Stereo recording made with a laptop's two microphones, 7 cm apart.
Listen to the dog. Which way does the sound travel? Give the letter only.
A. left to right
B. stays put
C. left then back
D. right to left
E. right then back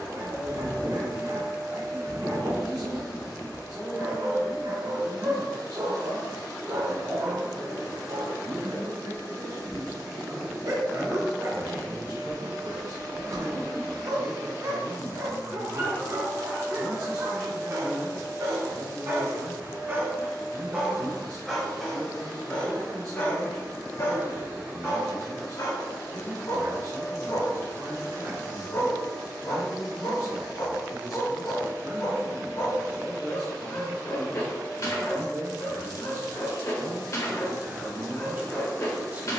D.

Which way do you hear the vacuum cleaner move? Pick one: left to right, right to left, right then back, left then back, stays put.
left then back.